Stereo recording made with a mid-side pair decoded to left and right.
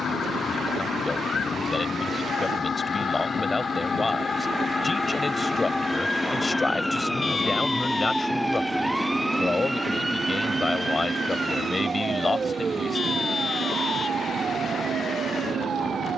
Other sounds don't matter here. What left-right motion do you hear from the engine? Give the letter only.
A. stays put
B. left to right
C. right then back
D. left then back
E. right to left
B.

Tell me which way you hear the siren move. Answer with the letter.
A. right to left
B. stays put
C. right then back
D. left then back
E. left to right
E.